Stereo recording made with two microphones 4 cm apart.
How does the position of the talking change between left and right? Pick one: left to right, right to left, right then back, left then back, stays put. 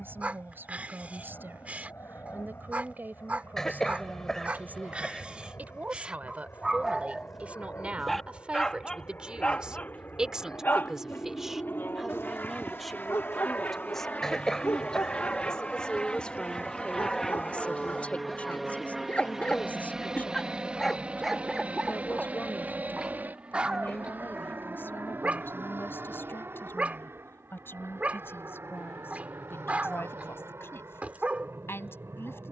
right to left.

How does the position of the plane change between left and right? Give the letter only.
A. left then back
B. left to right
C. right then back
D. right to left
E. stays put
B.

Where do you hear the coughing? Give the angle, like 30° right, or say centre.
10° left.